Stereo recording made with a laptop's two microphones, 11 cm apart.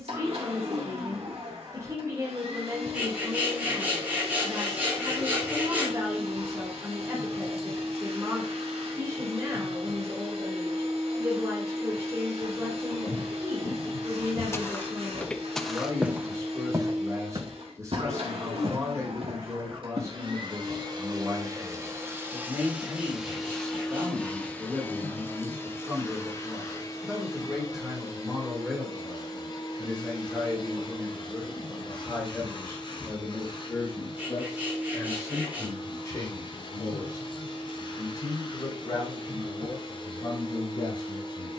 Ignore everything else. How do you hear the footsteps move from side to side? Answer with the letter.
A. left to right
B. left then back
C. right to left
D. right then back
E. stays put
A.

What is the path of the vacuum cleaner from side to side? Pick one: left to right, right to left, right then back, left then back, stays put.
right to left.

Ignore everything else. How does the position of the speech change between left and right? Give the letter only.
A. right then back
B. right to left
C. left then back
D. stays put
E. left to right
B.